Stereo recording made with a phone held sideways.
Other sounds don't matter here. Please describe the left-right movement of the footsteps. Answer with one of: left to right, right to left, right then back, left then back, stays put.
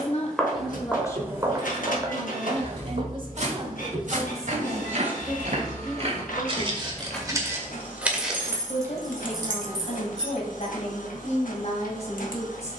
right then back.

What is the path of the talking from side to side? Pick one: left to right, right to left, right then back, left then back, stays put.
right then back.